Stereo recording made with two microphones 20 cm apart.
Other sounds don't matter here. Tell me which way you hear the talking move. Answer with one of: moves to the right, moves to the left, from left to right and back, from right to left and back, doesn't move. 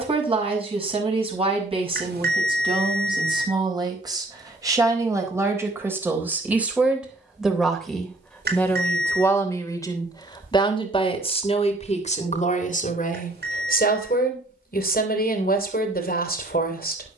moves to the left.